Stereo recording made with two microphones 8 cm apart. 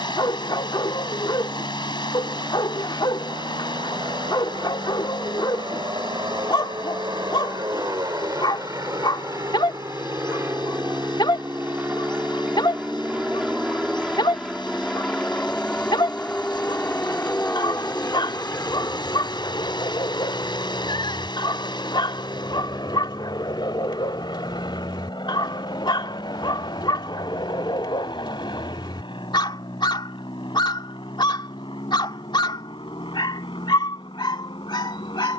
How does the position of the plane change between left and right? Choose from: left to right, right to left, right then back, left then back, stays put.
right to left.